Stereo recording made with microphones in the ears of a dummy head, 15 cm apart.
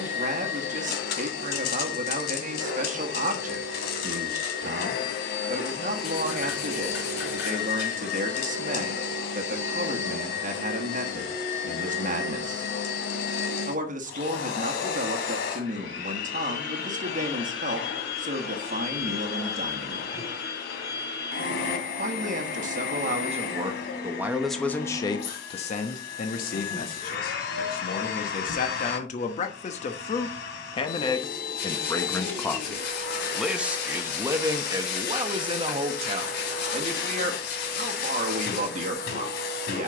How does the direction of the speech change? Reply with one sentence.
You can hear the speech go left and come back.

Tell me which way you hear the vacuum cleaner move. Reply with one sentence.
You can hear the vacuum cleaner stay put.